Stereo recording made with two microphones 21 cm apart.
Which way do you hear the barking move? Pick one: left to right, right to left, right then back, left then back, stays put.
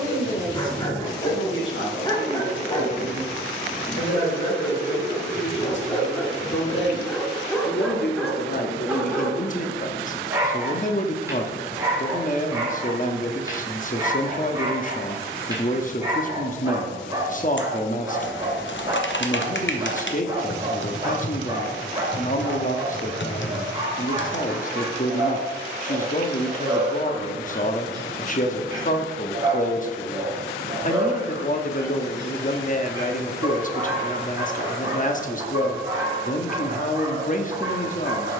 left to right.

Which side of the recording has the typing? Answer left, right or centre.
left.